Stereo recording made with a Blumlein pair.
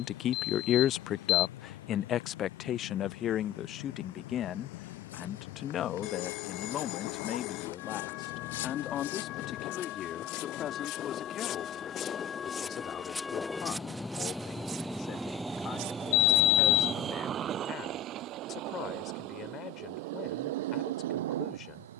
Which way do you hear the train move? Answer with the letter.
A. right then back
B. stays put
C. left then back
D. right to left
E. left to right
E.